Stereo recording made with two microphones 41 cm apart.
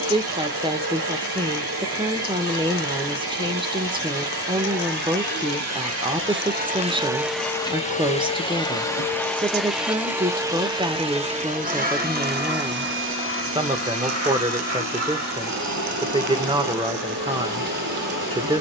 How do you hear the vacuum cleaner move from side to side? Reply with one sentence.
In this clip you hear the vacuum cleaner go left and come back.